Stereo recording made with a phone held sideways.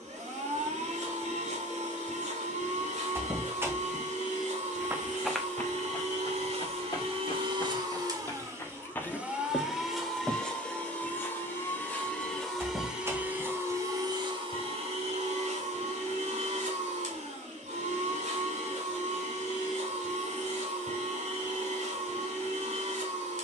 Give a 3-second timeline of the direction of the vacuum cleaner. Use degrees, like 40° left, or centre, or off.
70° right, 70° right, 40° right, centre, 20° right, 60° right, 70° right, 70° right.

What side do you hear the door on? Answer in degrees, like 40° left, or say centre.
20° right.